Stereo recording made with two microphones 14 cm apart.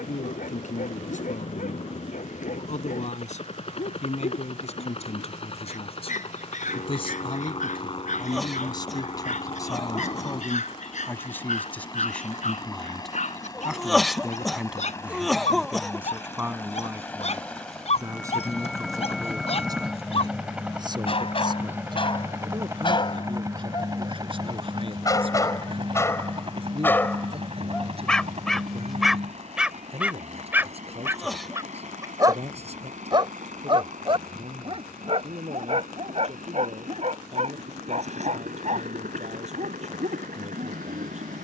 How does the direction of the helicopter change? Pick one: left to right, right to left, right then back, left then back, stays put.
left to right.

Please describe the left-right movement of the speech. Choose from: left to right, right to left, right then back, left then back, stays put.
left to right.